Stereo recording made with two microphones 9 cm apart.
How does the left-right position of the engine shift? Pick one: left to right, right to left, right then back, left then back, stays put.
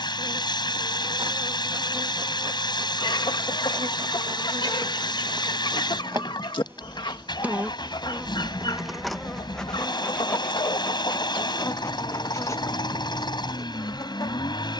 stays put.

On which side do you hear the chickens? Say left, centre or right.
left.